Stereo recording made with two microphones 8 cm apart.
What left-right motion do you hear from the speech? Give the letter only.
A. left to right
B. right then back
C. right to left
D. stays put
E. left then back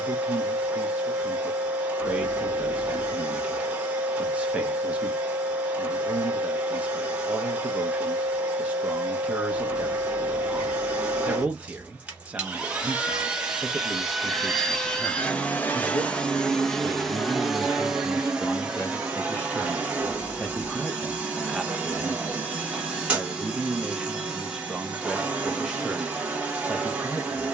E.